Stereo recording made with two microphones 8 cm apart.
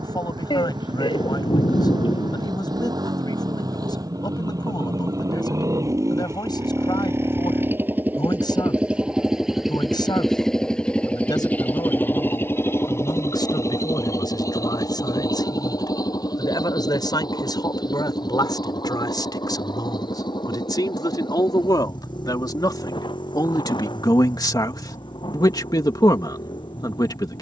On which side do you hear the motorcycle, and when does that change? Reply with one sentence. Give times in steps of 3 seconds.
You can hear the motorcycle on the right from 0 s, in the centre from 9 s and on the left from 12 s.